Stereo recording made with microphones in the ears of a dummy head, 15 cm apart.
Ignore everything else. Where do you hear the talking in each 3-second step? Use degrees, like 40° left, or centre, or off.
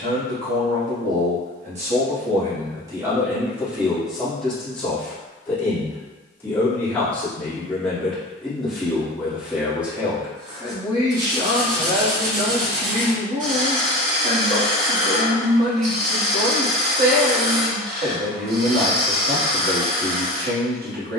40° right, centre, 10° left, 10° right, 40° right, 60° right, 60° right.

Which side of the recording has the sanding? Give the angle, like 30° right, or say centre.
70° right.